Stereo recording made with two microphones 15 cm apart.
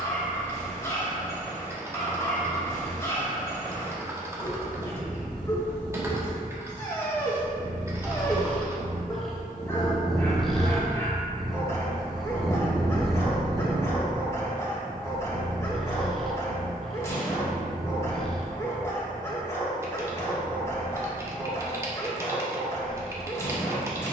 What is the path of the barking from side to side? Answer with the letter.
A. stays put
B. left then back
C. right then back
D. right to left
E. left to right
A.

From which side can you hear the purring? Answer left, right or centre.
centre.